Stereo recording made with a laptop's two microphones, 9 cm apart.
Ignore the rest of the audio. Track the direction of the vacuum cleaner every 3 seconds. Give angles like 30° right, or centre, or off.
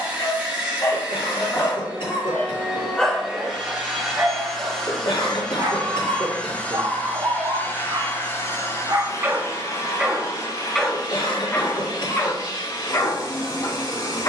20° right, centre, 20° left, 40° left, 50° left.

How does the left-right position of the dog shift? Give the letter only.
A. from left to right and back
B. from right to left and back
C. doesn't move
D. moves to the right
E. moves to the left
A.